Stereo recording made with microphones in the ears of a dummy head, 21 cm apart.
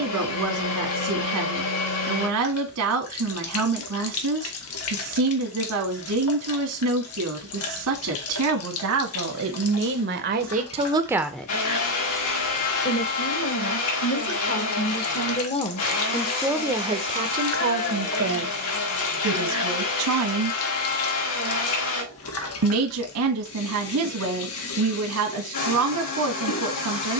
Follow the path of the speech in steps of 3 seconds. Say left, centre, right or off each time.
right, right, right, right, left, centre, right, right, right.